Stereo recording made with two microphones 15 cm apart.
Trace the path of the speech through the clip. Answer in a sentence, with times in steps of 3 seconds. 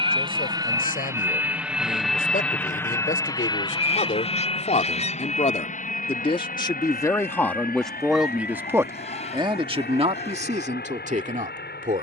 You can hear the speech on the left from 0 s, in the centre from 6 s and on the right from 9 s.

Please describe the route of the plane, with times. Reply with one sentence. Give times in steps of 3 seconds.
You can hear the plane in the centre from 0 s and on the left from 3 s.